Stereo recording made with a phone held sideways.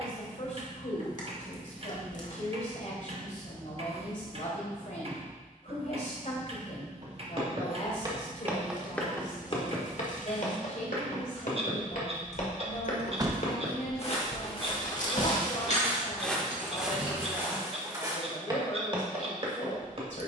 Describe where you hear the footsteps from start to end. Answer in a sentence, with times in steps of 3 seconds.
In this clip you hear the footsteps not at all from 0 s, on the right from 6 s, on the left from 9 s, in the centre from 15 s and on the right from 18 s.